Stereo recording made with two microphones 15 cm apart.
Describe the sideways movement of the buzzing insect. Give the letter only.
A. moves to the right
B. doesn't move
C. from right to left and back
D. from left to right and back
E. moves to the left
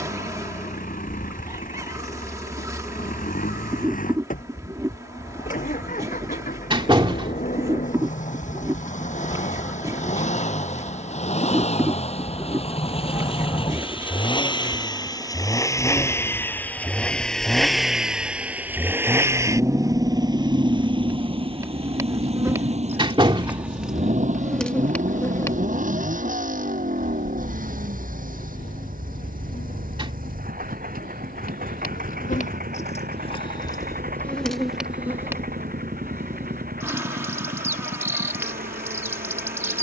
C.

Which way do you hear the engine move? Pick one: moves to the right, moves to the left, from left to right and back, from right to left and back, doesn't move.
moves to the right.